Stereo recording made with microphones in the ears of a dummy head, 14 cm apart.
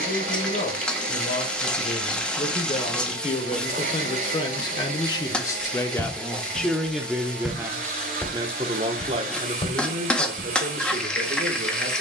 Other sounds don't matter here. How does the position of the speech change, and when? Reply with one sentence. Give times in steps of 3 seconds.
You can hear the speech on the left from 0 s, in the centre from 6 s and on the right from 9 s.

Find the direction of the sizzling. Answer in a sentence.
In this clip you hear the sizzling in the centre.